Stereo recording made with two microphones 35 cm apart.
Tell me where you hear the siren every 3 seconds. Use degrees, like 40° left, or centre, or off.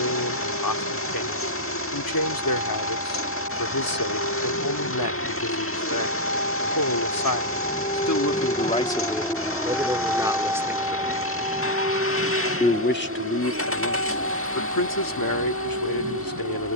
60° left, 50° left, 30° left, 10° right, 40° right, 50° right.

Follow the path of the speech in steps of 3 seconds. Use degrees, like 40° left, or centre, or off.
80° left, 80° left, 60° left, 10° right, 40° left, 70° left.